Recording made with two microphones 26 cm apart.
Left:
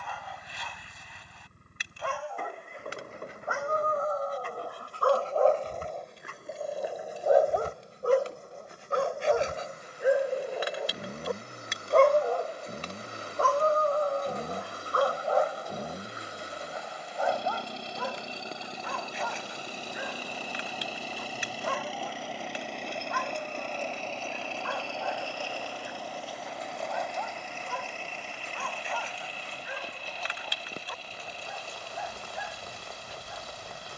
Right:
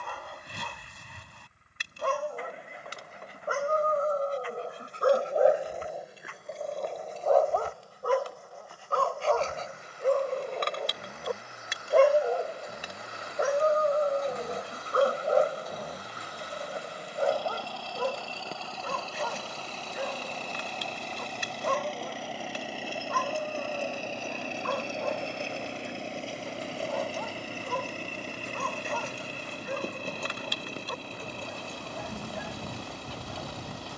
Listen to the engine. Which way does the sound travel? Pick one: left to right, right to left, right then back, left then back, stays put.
left to right.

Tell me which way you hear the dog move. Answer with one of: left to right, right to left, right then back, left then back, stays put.
left then back.